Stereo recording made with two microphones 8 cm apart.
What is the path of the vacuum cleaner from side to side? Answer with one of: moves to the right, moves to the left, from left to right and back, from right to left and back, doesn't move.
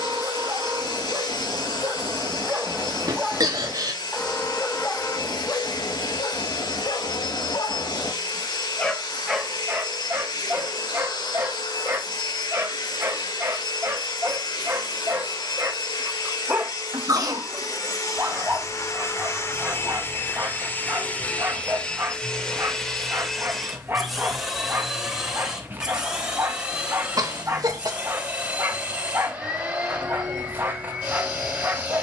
moves to the right.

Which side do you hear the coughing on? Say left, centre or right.
right.